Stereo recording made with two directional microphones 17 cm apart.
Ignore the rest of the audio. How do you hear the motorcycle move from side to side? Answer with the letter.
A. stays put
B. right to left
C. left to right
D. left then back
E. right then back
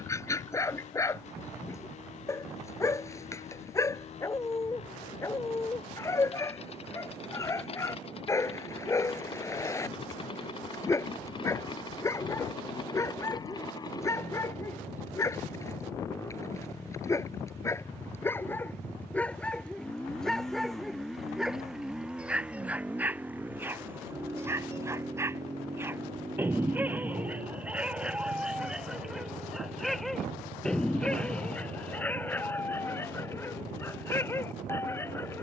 C.